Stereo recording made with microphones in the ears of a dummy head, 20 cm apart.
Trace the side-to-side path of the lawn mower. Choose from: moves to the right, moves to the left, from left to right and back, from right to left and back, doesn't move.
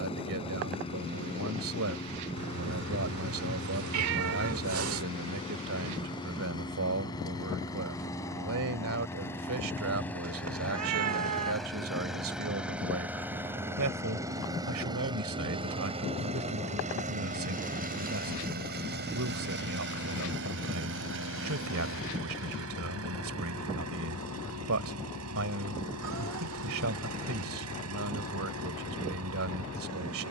moves to the right.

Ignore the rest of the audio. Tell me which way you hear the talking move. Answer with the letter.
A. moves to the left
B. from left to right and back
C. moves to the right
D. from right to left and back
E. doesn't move
E.